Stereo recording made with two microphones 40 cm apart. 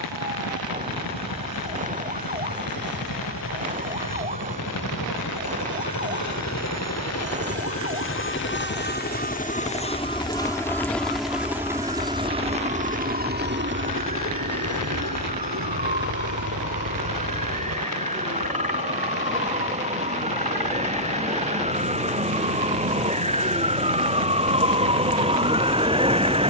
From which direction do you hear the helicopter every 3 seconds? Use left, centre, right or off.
left, left, left, centre, right, right, right, right, right.